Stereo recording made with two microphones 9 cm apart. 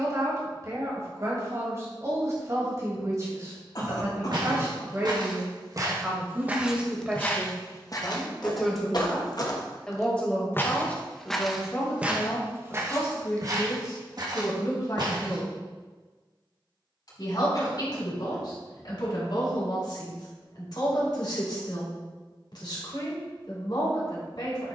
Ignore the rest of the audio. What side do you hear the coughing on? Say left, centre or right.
left.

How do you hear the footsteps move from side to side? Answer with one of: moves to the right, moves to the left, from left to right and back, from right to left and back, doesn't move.
from right to left and back.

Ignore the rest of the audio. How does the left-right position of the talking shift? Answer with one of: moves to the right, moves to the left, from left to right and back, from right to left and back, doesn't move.
moves to the left.